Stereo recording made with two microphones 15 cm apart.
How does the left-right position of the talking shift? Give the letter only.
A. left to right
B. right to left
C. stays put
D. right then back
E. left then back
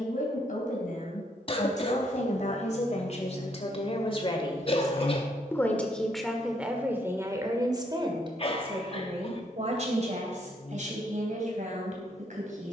A.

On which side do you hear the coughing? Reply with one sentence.
You can hear the coughing on the left.